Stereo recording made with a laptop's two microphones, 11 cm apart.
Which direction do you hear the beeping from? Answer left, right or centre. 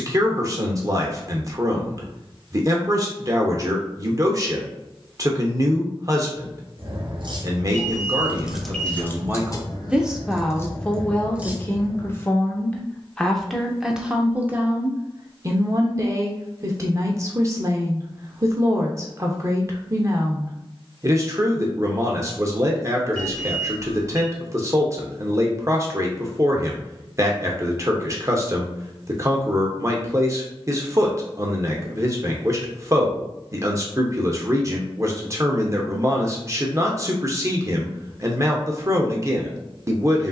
centre.